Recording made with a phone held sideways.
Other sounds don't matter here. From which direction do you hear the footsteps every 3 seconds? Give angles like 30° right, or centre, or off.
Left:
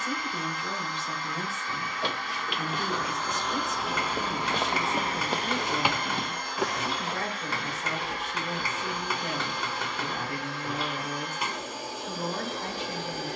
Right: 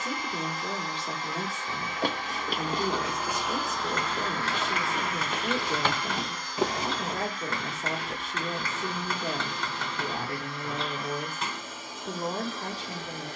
40° right, 20° left, 30° right, off, off.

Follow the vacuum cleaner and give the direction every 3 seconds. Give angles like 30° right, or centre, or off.
20° right, 20° left, 70° left, 80° left, 80° left.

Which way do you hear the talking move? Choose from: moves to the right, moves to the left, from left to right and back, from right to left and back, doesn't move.
doesn't move.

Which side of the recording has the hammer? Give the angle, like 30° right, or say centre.
10° left.